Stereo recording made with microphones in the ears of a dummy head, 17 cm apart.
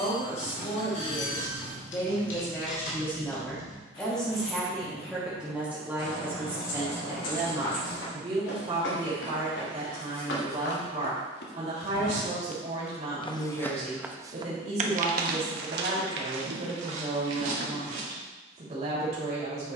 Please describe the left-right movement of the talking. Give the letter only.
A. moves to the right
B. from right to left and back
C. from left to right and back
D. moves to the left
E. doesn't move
A.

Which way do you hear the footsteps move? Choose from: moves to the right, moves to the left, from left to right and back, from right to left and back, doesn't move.
moves to the right.